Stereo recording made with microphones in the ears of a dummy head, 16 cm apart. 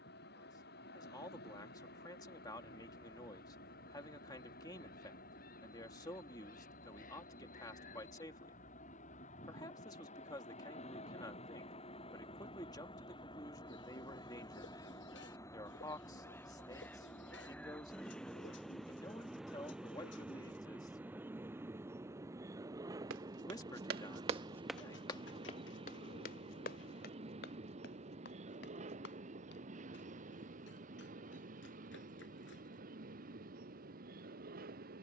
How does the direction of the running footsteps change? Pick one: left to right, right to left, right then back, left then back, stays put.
right to left.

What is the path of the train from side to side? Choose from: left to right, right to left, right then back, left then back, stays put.
left to right.